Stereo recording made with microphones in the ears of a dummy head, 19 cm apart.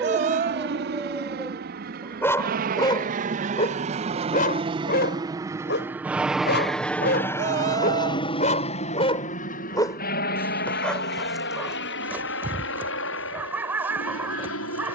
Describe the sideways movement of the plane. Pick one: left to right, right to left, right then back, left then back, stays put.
right to left.